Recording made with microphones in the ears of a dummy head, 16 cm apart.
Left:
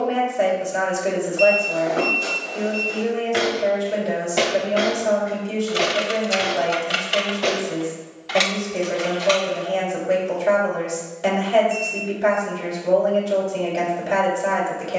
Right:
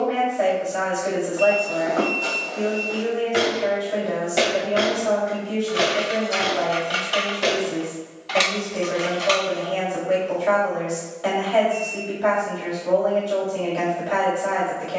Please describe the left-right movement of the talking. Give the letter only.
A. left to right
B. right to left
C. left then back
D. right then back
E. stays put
E.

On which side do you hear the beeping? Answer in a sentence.
In this clip you hear the beeping on the left.